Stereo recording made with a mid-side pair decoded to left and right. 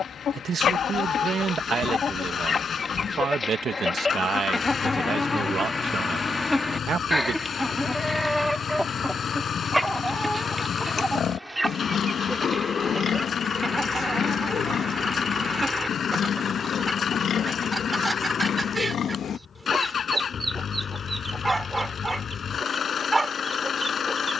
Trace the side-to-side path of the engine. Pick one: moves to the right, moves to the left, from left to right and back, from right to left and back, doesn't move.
doesn't move.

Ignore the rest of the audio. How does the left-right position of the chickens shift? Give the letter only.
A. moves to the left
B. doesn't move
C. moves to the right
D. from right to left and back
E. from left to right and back
C.